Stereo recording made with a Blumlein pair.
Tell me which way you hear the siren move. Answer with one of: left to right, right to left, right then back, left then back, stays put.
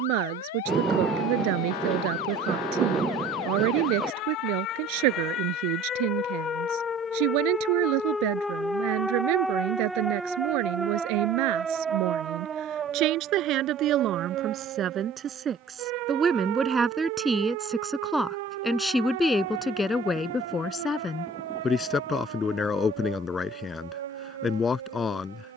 left to right.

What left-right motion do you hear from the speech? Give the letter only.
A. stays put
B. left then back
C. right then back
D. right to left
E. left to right
D.